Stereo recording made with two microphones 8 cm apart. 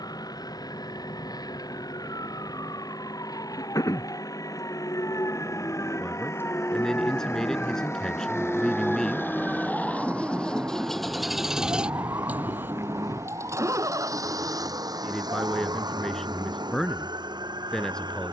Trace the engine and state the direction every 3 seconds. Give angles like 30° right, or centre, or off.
60° left, 50° left, 40° left, 10° left, 40° right, 70° right.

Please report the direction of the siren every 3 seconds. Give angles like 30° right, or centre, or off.
60° left, 50° left, 10° left, 20° right, 50° right, 60° right.